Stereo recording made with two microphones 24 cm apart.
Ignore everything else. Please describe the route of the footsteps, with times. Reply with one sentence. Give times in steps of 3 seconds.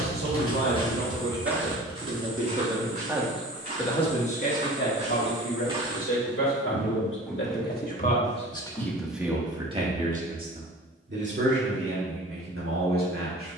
You can hear the footsteps in the centre from 0 s, on the right from 3 s, in the centre from 6 s and not at all from 9 s.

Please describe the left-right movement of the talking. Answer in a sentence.
In this clip you hear the talking go left and come back.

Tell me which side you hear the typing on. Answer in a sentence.
In this clip you hear the typing on the left.